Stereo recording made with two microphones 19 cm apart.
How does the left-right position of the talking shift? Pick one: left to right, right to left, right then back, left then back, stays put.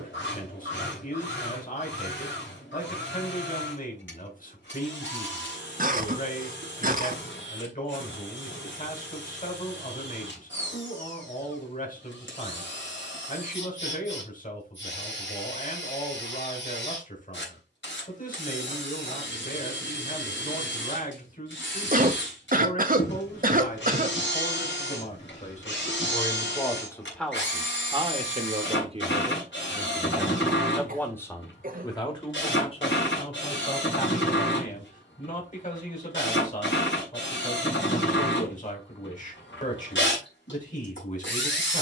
right then back.